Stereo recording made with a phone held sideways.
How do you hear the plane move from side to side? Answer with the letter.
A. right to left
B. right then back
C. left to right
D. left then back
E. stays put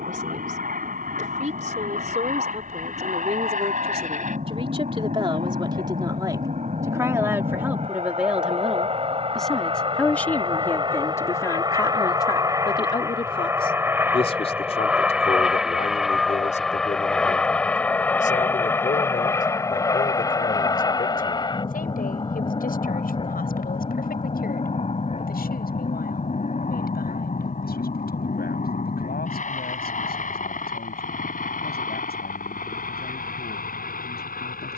A.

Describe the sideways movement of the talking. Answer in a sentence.
You can hear the talking move to the left.